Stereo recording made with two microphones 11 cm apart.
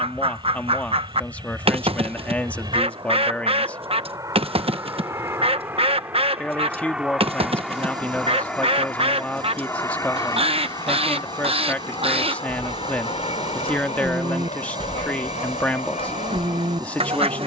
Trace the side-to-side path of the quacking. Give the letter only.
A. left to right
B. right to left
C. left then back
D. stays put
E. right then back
D.